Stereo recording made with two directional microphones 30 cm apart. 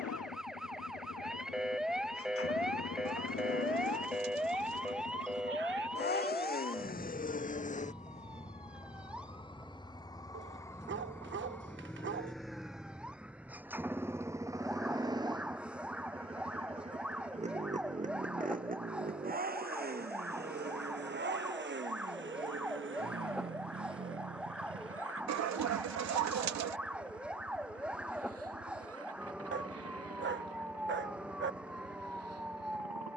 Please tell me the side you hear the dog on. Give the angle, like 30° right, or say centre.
40° right.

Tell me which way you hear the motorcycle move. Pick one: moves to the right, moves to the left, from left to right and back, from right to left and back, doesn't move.
moves to the right.